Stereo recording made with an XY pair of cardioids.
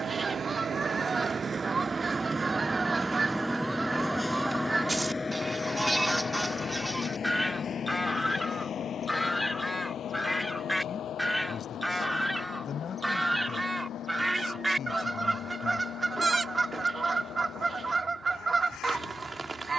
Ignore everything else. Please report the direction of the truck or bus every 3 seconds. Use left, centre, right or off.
right, centre, left, left, left, left, left.